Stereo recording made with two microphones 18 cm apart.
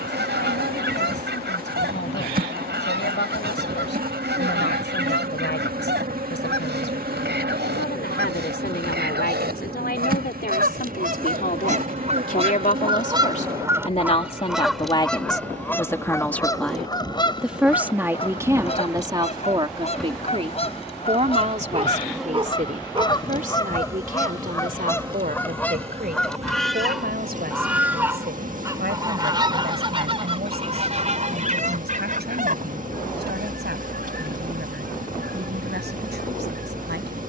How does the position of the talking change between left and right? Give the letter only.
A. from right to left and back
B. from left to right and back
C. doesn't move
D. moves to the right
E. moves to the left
D.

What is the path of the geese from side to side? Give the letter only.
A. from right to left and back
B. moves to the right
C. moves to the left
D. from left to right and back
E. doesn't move
A.